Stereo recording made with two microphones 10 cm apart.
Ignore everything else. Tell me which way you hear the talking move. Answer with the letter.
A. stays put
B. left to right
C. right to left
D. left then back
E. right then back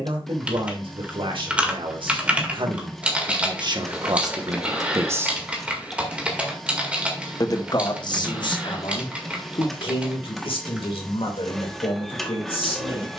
C.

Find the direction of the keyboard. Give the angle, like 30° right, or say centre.
10° right.